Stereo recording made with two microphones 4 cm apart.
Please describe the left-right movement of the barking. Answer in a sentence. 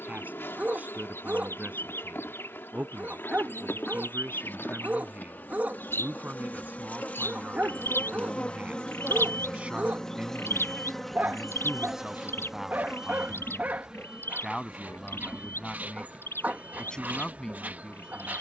In this clip you hear the barking stay put.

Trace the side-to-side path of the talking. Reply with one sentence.
In this clip you hear the talking go from the right side to the left.